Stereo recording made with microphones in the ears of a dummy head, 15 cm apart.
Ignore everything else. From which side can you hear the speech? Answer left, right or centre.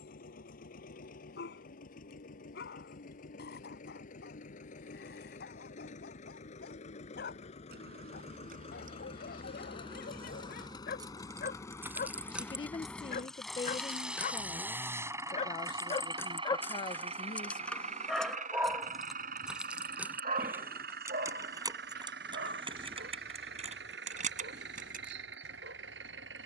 left.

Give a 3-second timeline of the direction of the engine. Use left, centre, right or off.
left, left, left, left, centre, right, right, right, right.